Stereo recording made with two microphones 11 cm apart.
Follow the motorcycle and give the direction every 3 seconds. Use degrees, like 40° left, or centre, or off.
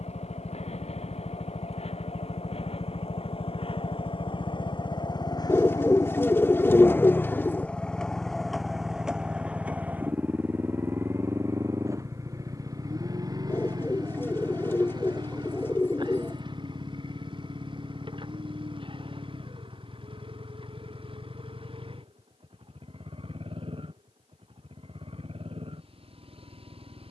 70° left, 50° left, 10° left, 20° right, 40° right, 40° right, 50° right, 50° right, 60° right.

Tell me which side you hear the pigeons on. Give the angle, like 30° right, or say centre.
20° left.